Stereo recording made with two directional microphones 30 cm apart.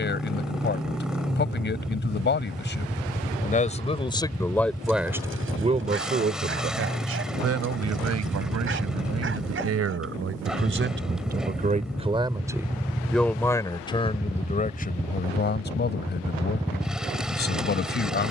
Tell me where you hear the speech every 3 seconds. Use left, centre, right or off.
left, centre, right, right, centre, left.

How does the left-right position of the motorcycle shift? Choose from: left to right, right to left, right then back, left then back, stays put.
stays put.